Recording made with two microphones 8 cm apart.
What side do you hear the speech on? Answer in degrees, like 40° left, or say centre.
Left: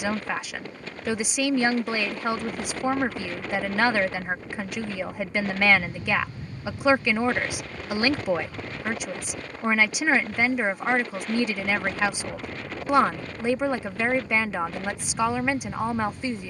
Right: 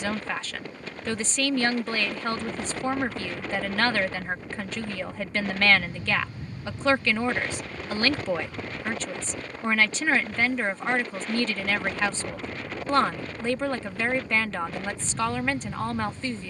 10° left.